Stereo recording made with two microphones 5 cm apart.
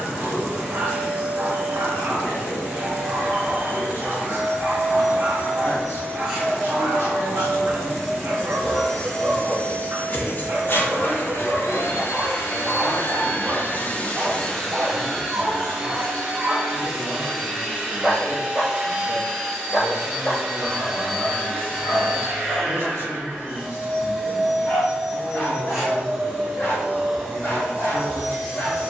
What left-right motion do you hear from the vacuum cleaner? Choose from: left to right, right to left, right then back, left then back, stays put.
left then back.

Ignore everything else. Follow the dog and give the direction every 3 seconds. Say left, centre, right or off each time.
right, right, right, right, right, right, left, left, left, left.